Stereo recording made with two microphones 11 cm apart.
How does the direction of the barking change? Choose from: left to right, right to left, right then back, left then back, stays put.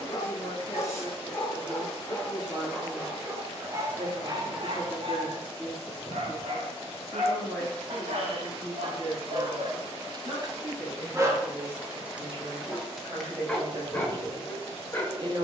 right then back.